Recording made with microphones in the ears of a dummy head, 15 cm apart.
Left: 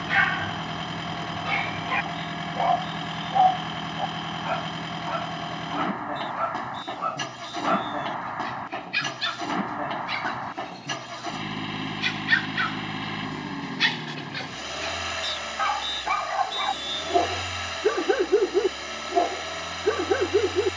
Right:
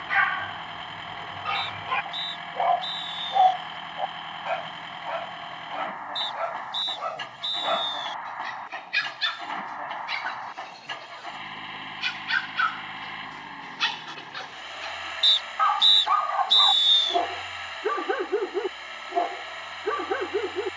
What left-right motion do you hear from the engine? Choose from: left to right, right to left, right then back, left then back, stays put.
stays put.